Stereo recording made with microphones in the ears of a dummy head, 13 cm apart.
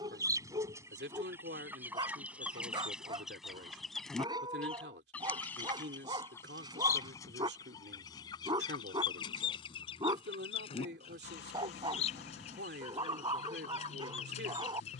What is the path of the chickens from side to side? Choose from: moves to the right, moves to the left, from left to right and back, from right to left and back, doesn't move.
moves to the left.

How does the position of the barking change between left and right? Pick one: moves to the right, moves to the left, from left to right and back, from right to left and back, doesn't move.
doesn't move.